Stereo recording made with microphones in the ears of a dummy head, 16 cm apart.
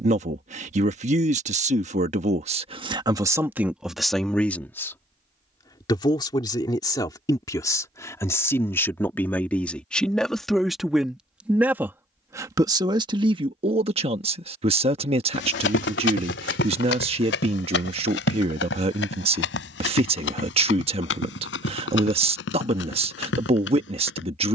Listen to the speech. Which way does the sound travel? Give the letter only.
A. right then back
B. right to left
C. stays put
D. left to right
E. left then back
E.